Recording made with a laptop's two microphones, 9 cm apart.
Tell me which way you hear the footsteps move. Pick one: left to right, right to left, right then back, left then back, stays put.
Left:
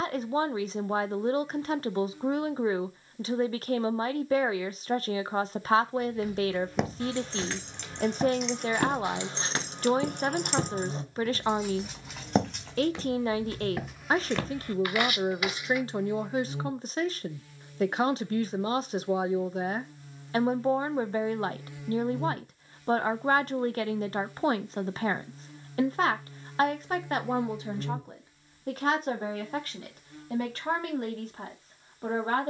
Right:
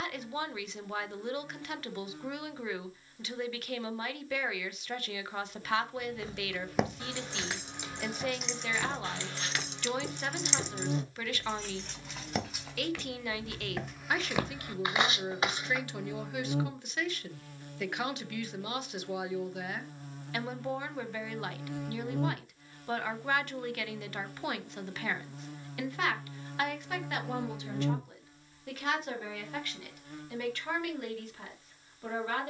left then back.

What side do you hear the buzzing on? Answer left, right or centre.
right.